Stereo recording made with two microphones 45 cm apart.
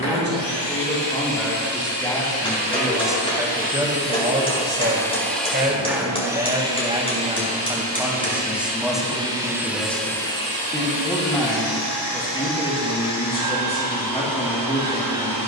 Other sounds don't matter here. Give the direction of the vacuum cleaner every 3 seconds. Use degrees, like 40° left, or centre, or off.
60° left, 10° left, 10° right, 20° left, 70° left.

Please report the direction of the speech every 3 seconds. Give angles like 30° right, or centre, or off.
10° left, 10° right, 10° right, centre, 10° left.